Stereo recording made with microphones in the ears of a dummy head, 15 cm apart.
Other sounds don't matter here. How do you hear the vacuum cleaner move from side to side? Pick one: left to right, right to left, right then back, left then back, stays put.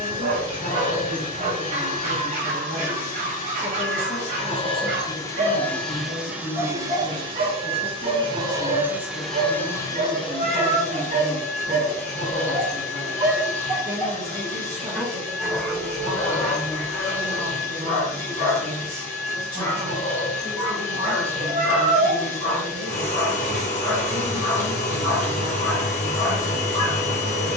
right then back.